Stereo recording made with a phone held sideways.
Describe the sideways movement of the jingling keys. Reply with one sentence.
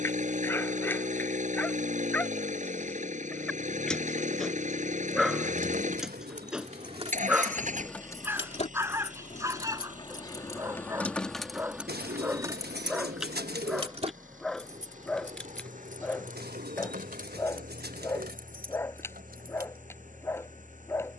In this clip you hear the jingling keys move from right to left and back again.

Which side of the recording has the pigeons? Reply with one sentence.
You can hear the pigeons on the right.